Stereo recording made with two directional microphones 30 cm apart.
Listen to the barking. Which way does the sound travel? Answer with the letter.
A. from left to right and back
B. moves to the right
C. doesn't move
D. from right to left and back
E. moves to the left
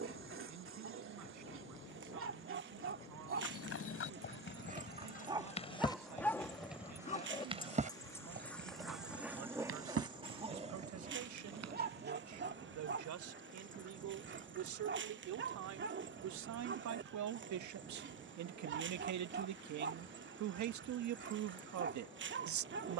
D.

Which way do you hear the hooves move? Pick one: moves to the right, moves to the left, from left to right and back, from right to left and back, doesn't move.
moves to the right.